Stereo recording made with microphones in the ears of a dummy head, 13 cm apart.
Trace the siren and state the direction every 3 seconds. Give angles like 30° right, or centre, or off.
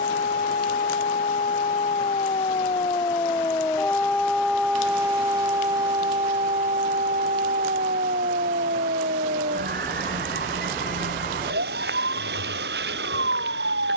40° left, centre, 50° right, 70° right, 80° right.